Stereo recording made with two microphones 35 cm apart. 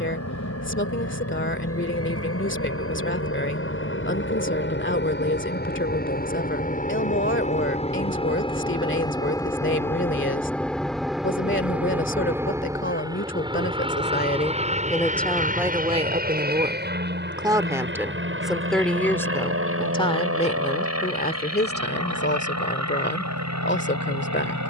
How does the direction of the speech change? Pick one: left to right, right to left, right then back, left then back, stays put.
right then back.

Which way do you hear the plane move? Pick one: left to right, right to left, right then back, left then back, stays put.
left to right.